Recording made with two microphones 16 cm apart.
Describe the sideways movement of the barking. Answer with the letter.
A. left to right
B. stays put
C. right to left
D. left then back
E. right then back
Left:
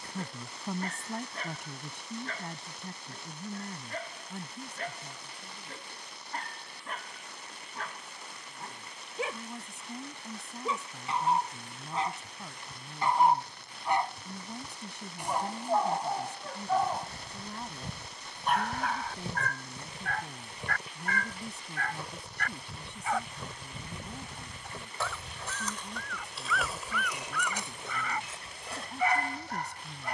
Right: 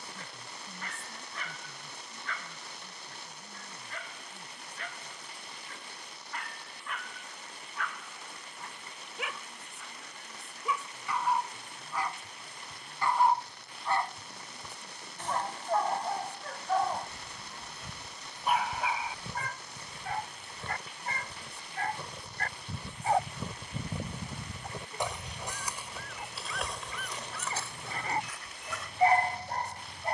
A.